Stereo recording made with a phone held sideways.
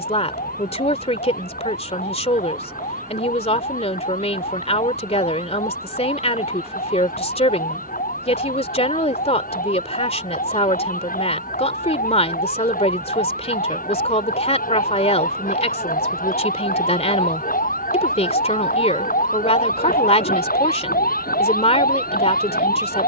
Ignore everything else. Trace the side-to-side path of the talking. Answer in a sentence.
In this clip you hear the talking stay in one place.